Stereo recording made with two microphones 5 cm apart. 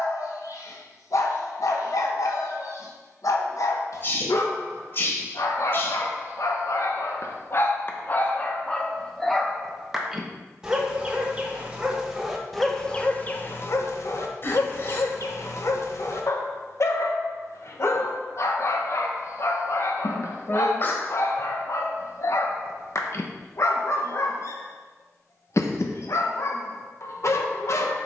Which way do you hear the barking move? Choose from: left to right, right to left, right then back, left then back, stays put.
right then back.